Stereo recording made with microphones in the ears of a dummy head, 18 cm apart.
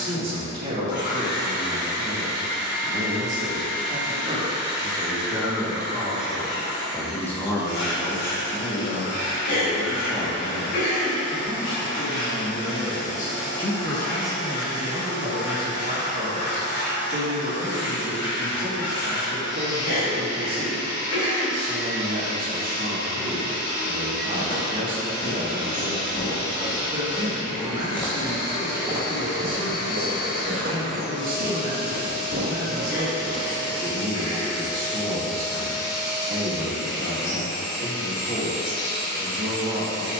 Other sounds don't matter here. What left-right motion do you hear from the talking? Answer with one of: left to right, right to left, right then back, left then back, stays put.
left then back.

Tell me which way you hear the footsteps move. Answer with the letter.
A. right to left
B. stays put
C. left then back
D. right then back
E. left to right
E.